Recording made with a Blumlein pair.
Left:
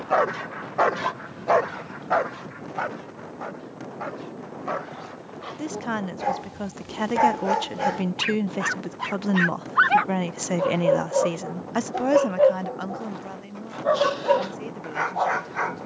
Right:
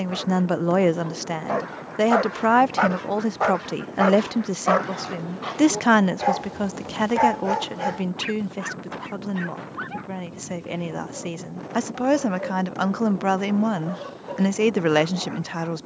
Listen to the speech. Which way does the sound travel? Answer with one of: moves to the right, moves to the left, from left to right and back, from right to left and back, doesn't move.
from right to left and back.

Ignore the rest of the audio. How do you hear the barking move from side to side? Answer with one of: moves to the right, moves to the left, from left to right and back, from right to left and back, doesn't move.
from left to right and back.